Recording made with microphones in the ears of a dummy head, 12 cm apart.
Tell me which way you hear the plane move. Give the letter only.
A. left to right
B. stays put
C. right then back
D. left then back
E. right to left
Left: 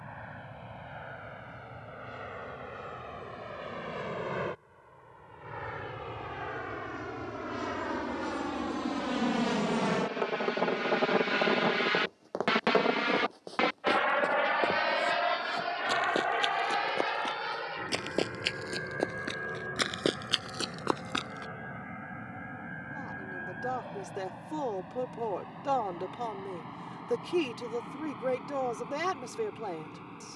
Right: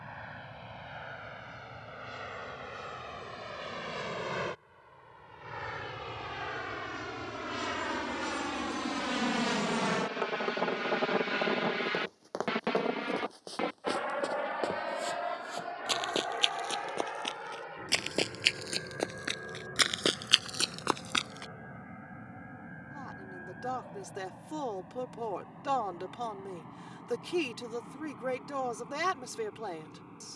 E.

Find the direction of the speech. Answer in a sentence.
In this clip you hear the speech on the right.